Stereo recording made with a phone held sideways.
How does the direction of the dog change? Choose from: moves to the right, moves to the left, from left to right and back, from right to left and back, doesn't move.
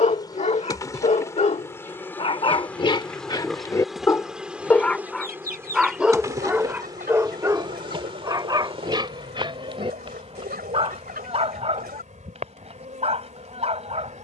moves to the right.